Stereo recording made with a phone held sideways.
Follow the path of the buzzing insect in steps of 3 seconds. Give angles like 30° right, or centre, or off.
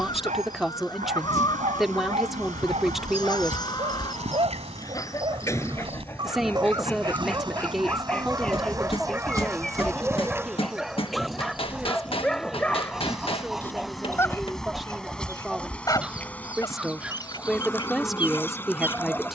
60° right, 50° right, 30° right, 20° right, centre, 10° left, 20° left.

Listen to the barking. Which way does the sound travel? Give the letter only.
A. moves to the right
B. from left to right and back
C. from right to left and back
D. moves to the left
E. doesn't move
D.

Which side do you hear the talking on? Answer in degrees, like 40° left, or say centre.
centre.